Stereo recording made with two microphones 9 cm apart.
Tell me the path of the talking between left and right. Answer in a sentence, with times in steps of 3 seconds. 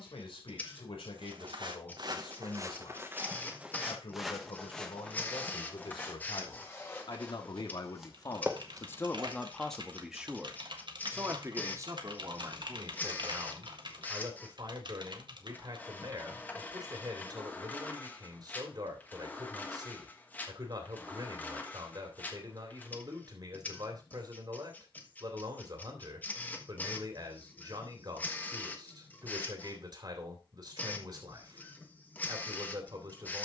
In this clip you hear the talking on the left from 0 s, in the centre from 9 s and on the right from 12 s.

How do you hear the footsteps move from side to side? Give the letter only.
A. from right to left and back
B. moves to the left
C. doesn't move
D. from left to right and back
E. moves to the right
A.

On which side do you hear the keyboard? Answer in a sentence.
You can hear the keyboard on the right.